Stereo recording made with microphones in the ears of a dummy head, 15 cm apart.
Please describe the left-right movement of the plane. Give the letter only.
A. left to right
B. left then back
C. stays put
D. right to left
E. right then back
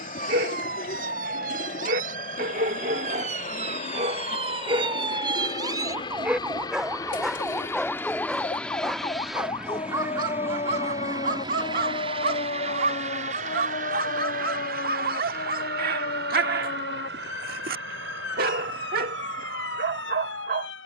A.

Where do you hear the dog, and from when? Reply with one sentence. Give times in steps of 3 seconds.
You can hear the dog on the right from 0 s, in the centre from 6 s and on the right from 9 s.